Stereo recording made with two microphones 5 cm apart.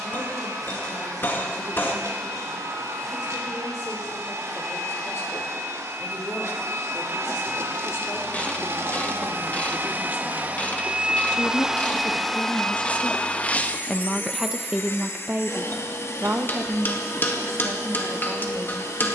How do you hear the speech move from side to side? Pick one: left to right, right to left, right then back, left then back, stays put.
left to right.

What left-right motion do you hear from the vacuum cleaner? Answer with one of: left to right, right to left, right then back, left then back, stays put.
right to left.